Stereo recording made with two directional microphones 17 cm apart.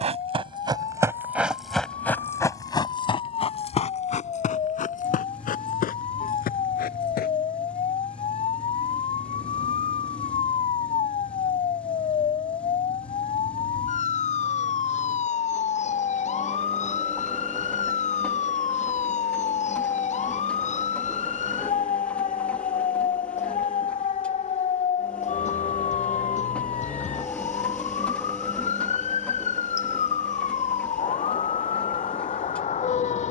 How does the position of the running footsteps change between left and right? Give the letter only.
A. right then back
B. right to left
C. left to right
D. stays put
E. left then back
B.